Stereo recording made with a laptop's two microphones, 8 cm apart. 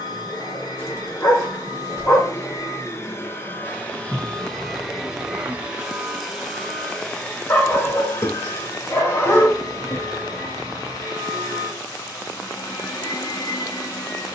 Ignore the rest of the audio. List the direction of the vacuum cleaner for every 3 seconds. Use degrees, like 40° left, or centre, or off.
50° left, 10° left, 20° left, 50° left, 50° left.